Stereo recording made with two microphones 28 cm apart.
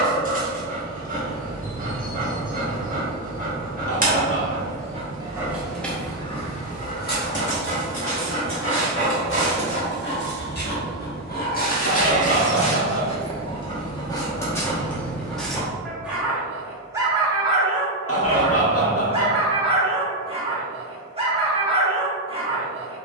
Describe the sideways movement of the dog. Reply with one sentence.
You can hear the dog go left and come back.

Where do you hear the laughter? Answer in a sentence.
In this clip you hear the laughter on the left.